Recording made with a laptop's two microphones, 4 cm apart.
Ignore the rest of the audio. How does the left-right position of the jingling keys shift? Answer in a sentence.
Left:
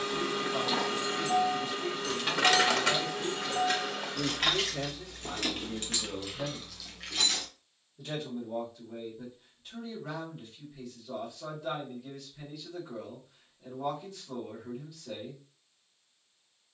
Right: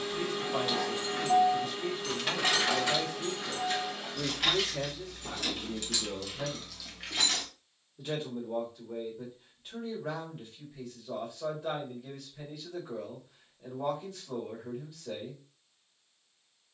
You can hear the jingling keys go left and come back.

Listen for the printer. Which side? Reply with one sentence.
You can hear the printer on the left.